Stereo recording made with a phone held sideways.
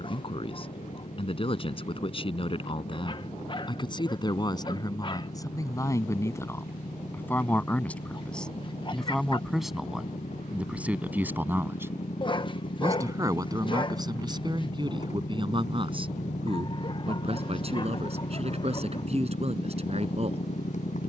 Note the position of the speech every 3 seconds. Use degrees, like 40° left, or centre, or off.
40° left, 30° left, 10° left, 10° right, 30° right, 40° right, 40° right.